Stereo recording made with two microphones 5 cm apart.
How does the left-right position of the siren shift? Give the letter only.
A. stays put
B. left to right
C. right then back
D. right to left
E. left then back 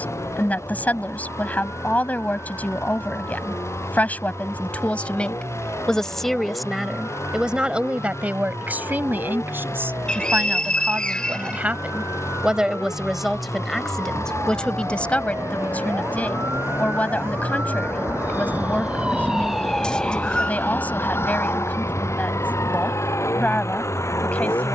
D.